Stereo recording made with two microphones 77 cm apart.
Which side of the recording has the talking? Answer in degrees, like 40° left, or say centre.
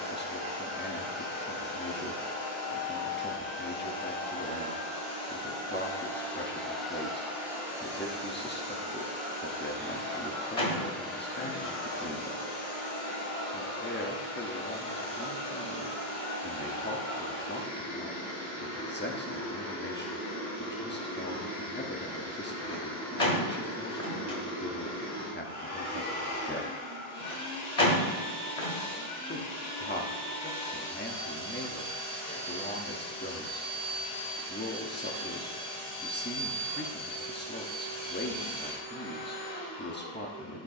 10° left.